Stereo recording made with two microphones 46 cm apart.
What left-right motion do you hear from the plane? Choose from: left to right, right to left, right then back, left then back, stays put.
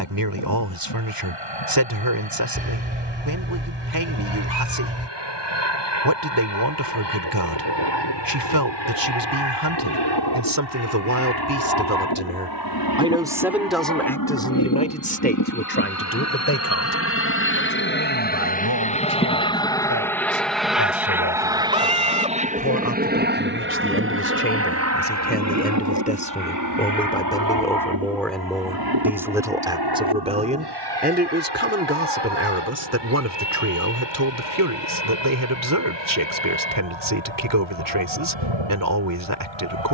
left to right.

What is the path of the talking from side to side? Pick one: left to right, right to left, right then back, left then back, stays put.
left then back.